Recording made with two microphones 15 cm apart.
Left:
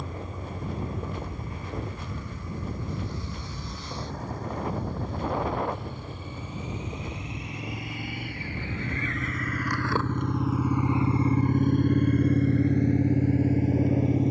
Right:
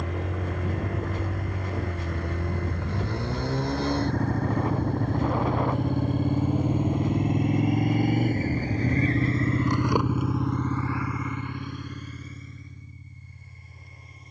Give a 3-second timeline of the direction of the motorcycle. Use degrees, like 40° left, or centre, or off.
60° right, 60° right, 50° right, 10° left, 70° left.